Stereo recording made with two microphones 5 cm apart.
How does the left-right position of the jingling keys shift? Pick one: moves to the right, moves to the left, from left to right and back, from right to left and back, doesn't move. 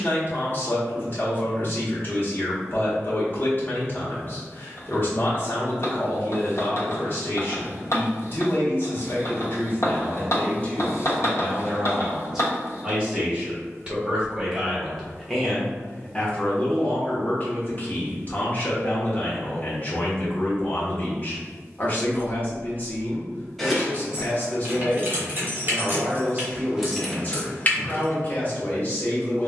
from left to right and back.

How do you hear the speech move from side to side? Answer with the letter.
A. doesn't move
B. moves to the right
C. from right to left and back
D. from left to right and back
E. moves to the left
D.